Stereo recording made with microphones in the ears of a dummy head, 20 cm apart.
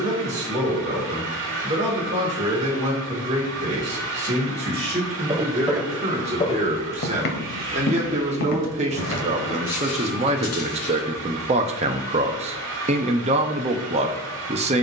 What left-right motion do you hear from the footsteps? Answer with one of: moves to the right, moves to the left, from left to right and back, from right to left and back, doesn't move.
moves to the left.